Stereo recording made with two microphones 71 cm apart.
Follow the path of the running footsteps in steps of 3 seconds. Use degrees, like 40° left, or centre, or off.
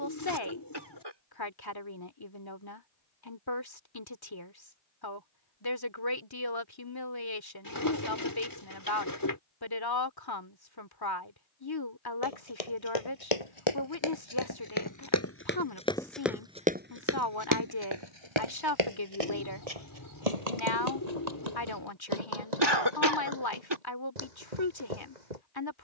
off, off, off, off, 40° left, 10° right, 50° right, 70° right, 70° right.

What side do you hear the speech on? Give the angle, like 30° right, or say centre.
30° left.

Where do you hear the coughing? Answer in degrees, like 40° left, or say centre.
30° right.